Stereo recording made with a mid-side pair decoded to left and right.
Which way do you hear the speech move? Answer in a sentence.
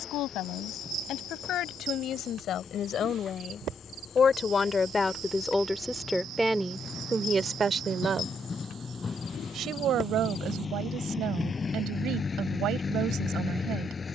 You can hear the speech move to the right.